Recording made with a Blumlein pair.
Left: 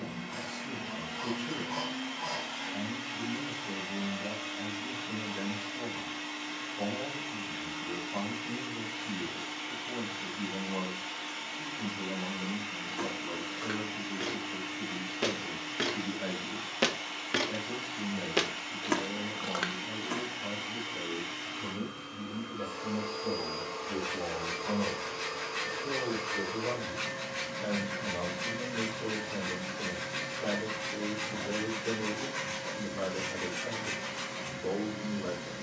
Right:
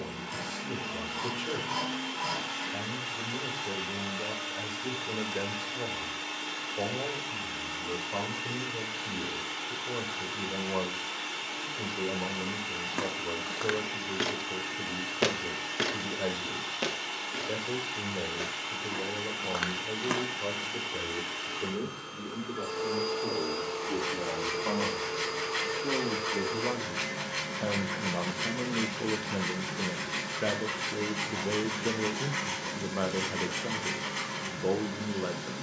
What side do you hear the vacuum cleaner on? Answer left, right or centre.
right.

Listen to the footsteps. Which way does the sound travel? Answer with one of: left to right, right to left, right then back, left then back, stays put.
left then back.